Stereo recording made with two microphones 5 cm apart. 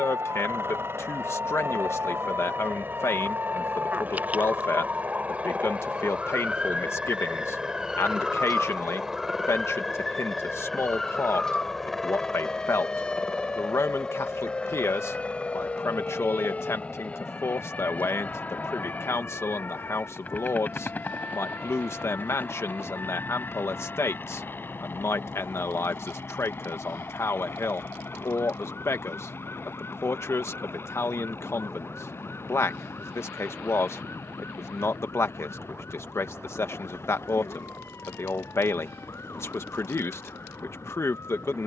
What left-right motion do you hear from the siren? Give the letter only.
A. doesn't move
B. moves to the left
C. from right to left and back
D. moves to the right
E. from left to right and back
B.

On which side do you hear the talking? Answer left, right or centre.
left.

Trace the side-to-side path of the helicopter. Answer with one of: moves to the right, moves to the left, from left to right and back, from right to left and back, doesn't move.
moves to the left.